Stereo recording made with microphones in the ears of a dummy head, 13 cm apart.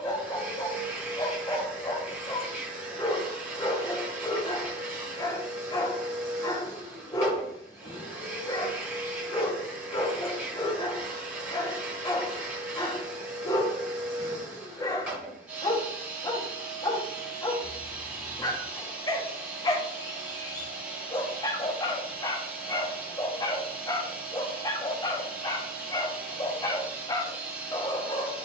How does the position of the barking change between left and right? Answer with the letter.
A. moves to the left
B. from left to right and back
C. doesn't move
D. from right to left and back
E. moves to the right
C.